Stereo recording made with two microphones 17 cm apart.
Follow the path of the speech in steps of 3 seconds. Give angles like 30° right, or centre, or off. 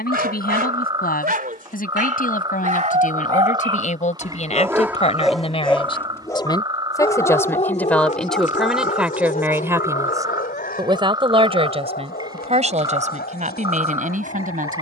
60° left, 40° left, 10° left, 20° right, 50° right.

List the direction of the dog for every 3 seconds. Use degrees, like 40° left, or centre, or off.
60° right, 20° right, 40° left, 60° left, 70° left.